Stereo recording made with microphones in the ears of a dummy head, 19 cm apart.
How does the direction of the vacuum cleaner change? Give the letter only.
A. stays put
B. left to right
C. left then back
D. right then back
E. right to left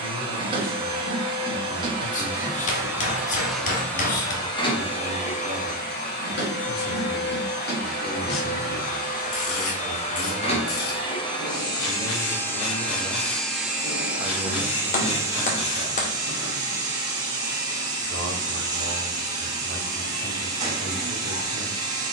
C.